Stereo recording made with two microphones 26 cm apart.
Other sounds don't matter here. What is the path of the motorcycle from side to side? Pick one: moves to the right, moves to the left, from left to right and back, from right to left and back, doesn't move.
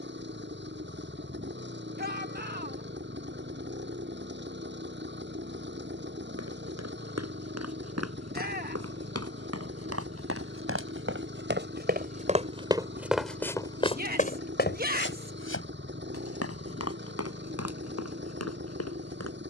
doesn't move.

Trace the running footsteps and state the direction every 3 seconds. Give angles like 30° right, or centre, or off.
off, off, 70° right, 50° right, 10° left, 60° left, 70° left.